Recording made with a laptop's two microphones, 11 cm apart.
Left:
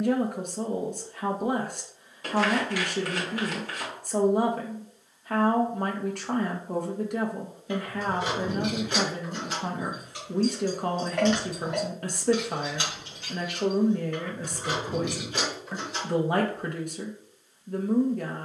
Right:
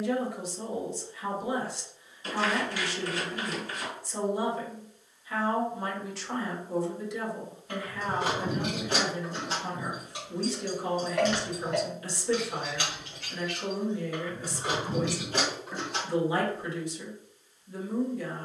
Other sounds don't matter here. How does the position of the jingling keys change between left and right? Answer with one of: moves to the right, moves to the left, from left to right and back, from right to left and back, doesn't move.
from right to left and back.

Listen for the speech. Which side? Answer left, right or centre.
left.